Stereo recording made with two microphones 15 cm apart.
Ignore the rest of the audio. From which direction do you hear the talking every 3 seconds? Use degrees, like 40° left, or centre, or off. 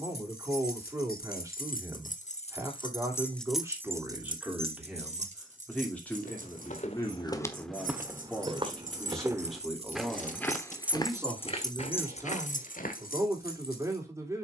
20° right, 10° right, 10° left, 10° right, 20° right.